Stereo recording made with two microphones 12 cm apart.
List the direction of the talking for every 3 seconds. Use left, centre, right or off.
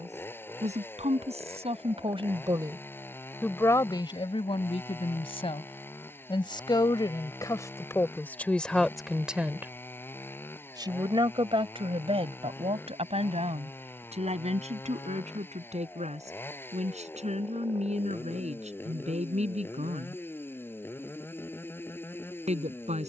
right, left, left, right, right, right, right, right.